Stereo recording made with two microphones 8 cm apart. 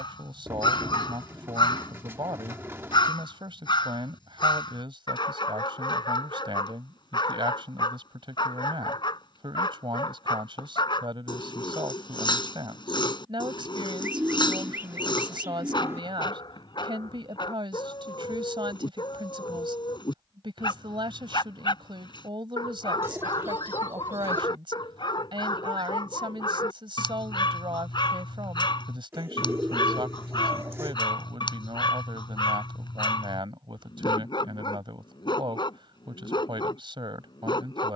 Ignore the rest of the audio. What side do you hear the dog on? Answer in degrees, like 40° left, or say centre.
60° left.